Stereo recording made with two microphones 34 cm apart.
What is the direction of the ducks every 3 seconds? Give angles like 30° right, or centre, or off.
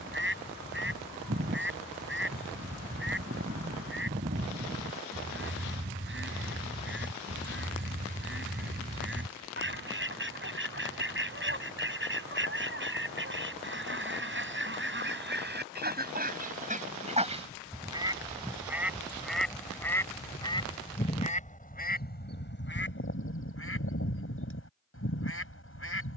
30° right, 30° right, 30° right, 30° right, 30° right, 20° right, centre, 30° left, 40° left.